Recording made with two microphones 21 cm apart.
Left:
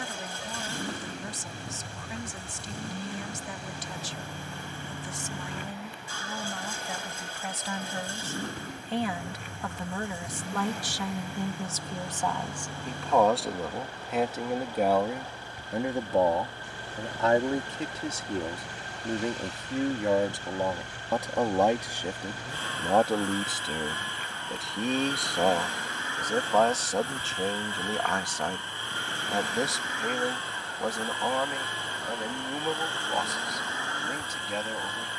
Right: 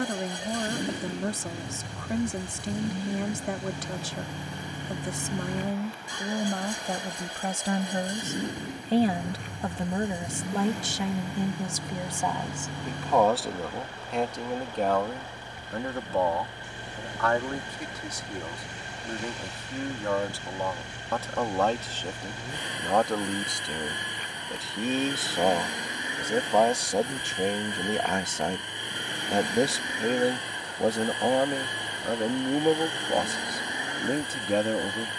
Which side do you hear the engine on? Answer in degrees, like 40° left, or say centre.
20° right.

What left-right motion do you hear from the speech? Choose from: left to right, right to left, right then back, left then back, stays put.
left then back.